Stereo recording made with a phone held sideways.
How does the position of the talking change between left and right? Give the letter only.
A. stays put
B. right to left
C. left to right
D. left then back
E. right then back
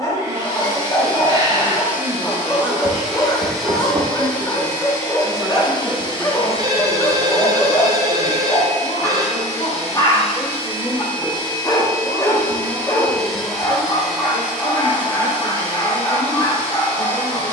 B.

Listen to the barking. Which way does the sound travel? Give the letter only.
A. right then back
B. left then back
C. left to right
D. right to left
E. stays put
E.